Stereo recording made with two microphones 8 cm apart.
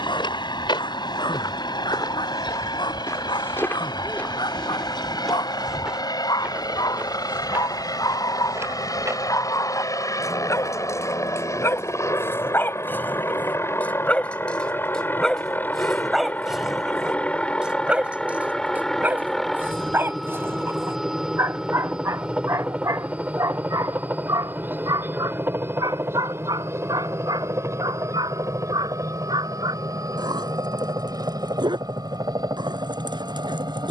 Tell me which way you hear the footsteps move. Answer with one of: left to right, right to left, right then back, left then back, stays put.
left to right.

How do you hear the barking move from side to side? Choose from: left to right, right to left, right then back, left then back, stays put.
left to right.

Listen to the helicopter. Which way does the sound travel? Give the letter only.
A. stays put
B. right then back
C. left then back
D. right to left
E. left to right
E.